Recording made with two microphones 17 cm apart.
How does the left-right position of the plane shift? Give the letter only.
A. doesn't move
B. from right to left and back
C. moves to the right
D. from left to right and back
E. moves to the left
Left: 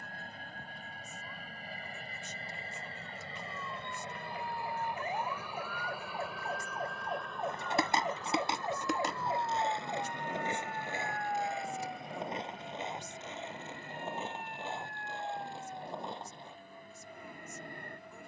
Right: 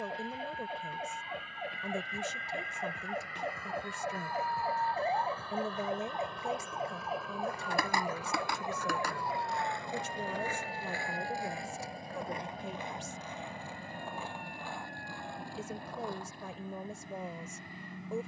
C.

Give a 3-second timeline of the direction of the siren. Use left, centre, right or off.
right, right, centre, left, left, left.